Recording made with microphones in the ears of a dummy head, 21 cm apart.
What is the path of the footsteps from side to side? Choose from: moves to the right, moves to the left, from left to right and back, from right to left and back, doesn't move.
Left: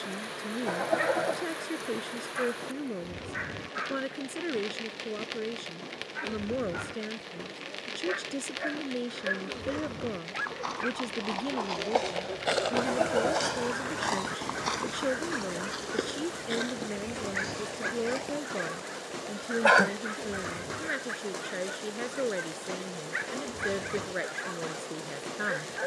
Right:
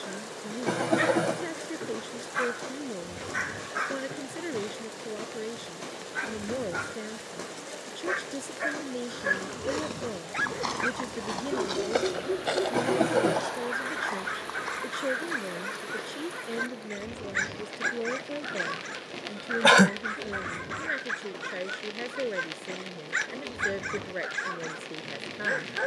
moves to the left.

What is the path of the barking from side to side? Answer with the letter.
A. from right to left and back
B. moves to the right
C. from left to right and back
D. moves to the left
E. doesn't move
E.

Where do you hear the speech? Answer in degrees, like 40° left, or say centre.
10° left.